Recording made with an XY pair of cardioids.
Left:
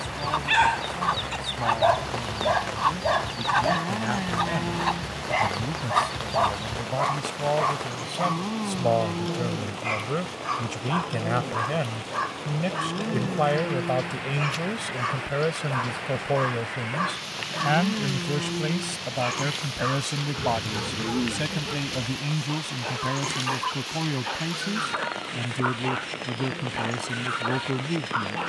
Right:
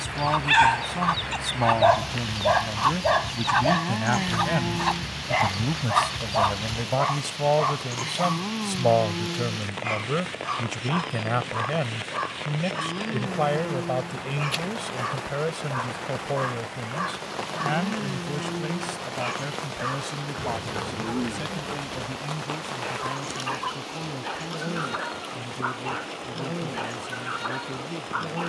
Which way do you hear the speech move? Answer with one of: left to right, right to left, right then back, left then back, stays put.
right to left.